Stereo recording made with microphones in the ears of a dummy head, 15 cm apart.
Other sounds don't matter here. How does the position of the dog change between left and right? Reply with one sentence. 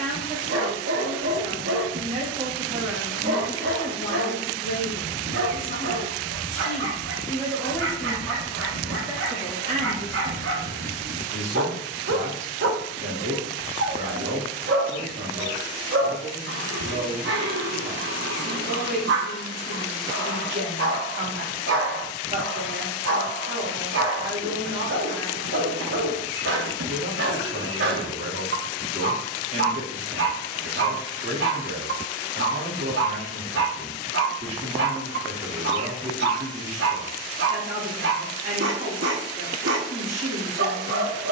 You can hear the dog stay in one place.